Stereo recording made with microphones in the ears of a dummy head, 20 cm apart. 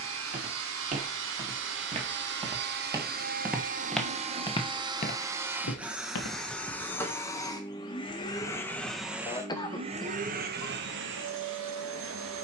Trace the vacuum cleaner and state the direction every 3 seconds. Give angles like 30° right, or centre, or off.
60° right, 20° right, 10° left, 40° right.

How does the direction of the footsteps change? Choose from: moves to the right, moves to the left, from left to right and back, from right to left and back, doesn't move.
moves to the left.